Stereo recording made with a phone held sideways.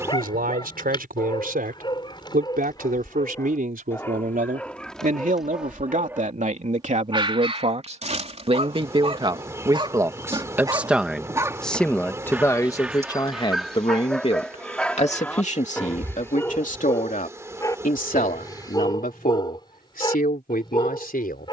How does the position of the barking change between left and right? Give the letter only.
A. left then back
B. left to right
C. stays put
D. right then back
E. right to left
D.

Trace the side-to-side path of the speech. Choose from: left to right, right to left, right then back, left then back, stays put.
right to left.